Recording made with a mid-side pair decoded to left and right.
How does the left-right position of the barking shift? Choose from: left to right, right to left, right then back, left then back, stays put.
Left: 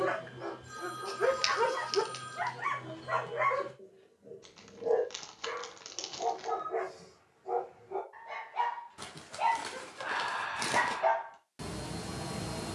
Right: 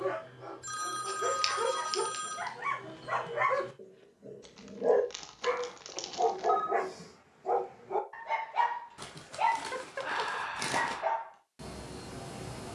right then back.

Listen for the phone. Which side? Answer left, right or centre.
right.